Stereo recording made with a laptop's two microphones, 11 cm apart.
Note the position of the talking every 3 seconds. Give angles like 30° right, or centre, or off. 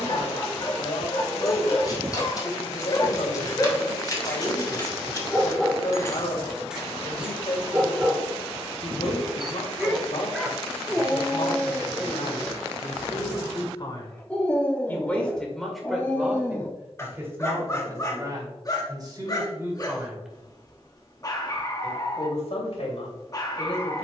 60° left, 60° left, 60° left, 60° left, 50° left, 10° right, 30° right, 60° left.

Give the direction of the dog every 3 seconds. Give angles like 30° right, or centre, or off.
40° left, 10° left, 10° right, centre, 10° left, 20° left, 30° left, 30° left.